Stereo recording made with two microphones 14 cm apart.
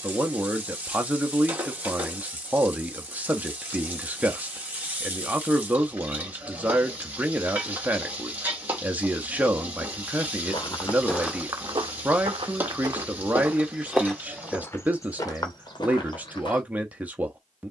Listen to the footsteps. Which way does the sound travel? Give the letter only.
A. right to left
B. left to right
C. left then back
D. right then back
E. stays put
D.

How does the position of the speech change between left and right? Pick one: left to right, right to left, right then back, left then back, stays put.
stays put.